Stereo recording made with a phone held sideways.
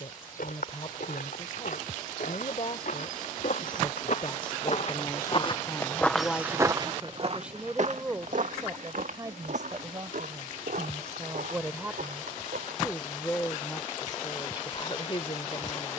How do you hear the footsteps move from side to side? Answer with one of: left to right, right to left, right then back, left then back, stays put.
left to right.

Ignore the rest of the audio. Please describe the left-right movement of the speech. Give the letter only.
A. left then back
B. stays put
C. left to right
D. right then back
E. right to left
D.